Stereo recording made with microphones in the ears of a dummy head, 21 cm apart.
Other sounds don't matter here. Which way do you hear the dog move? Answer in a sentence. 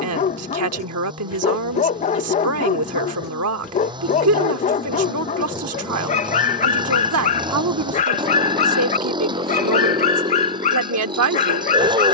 In this clip you hear the dog stay in one place.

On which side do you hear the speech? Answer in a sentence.
You can hear the speech on the right.